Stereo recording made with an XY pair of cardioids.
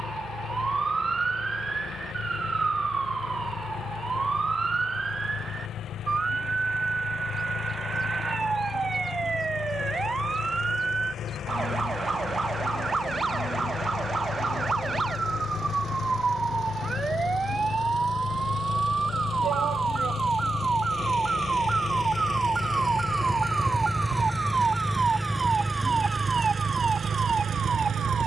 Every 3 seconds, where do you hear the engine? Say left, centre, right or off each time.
left, left, left, left, left, left, left, left, centre, right.